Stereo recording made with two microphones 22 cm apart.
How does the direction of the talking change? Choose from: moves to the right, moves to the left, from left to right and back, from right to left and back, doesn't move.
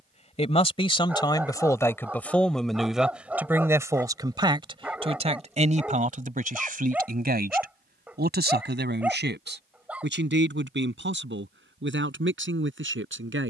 moves to the right.